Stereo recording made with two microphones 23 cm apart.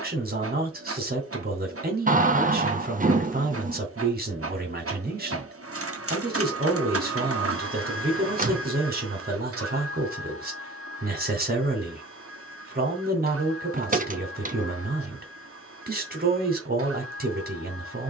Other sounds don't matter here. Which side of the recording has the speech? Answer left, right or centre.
right.